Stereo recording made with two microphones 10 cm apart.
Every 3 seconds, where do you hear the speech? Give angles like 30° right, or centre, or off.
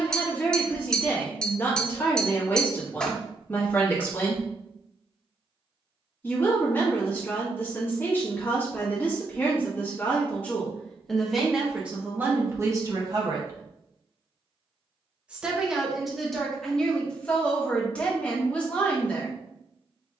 20° left, 20° left, 20° left, 10° left, 30° right, centre, 10° left.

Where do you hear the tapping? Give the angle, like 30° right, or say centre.
10° left.